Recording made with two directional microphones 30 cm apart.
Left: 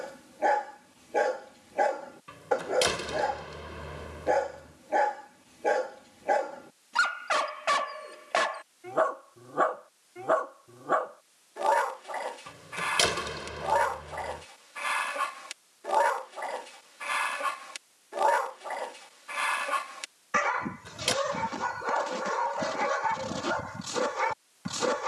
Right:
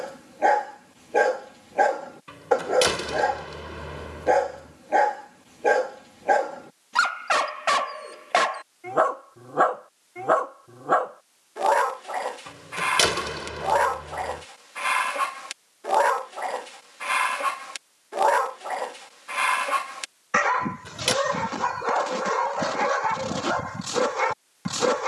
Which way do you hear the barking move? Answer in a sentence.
You can hear the barking stay in one place.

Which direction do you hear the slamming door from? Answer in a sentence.
In this clip you hear the slamming door on the right.